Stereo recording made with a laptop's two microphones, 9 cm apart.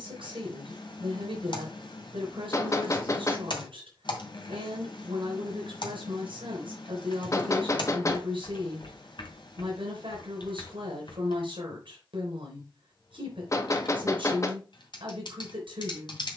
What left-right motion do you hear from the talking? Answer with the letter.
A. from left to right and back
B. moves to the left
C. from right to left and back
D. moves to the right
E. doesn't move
E.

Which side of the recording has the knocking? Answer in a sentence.
You can hear the knocking on the left.